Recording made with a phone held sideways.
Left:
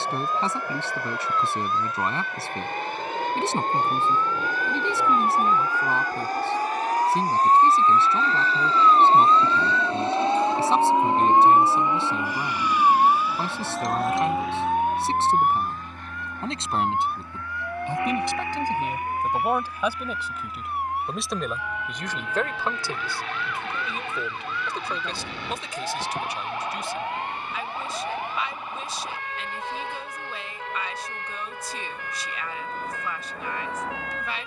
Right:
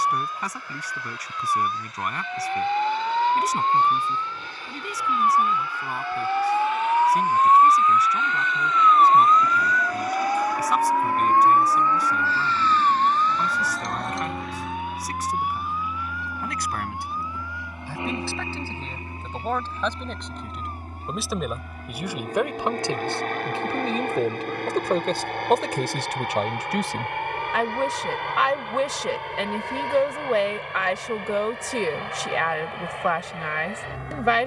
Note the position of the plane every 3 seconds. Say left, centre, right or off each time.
left, left, left, left, centre, centre, right, right, right, right, right, right.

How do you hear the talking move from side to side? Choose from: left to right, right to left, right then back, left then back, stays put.
left to right.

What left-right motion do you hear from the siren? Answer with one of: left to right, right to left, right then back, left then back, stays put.
right to left.